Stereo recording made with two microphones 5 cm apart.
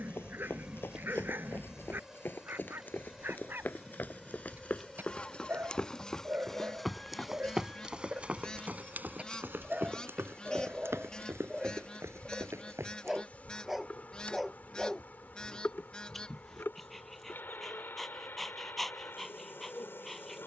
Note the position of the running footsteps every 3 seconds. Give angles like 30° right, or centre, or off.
50° left, 30° left, 10° right, 60° right, 80° right, off, off.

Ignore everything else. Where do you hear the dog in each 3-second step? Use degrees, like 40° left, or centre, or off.
50° right, 50° right, 40° right, 20° right, centre, 10° left, 10° left.